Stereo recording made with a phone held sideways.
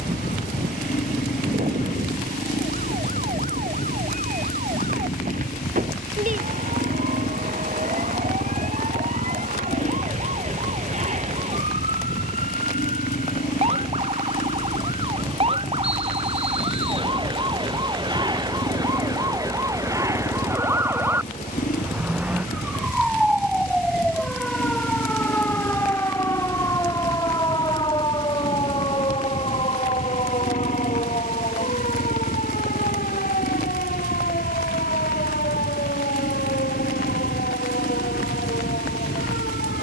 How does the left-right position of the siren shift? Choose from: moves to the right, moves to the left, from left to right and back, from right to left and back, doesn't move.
moves to the left.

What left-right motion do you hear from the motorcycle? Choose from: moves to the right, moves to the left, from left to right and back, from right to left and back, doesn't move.
doesn't move.